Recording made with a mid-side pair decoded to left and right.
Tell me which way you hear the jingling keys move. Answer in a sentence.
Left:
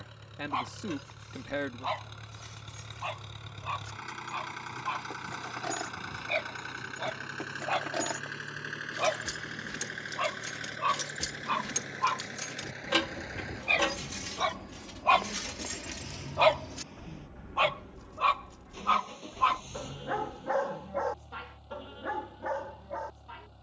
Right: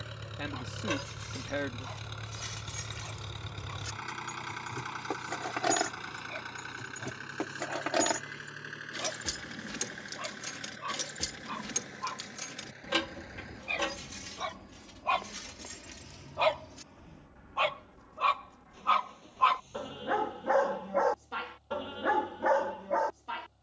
You can hear the jingling keys go from the right side to the left.